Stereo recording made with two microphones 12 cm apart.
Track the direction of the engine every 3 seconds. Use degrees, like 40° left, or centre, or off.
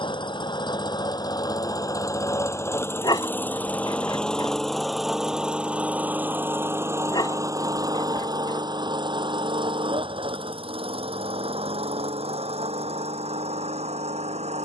30° left, centre, 30° right, 50° right, 60° right.